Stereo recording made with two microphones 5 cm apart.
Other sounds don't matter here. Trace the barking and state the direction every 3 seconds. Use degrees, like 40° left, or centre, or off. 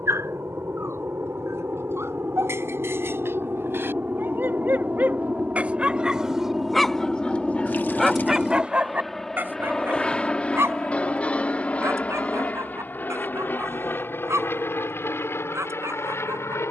50° right, 40° right, centre, 50° right, 60° right, 60° right.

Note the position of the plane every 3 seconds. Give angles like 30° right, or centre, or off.
50° right, 30° right, 10° right, 20° left, 30° left, 50° left.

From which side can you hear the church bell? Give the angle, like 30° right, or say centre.
20° left.